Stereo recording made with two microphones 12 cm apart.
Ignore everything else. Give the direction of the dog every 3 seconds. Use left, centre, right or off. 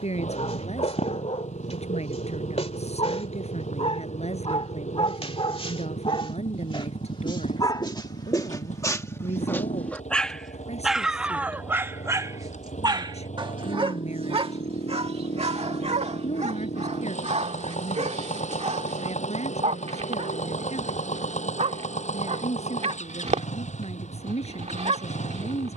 left, left, left, centre, right, right, right, right, right.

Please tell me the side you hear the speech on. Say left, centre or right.
left.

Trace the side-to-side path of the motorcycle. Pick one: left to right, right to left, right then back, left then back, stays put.
stays put.